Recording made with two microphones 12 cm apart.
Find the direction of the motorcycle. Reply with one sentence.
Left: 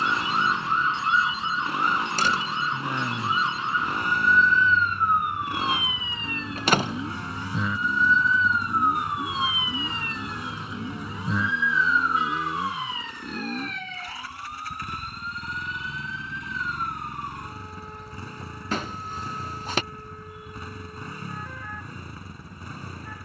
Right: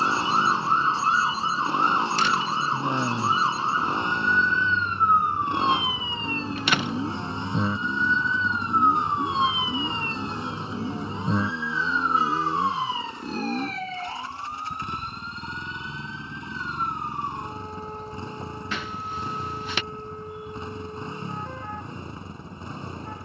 In this clip you hear the motorcycle on the right.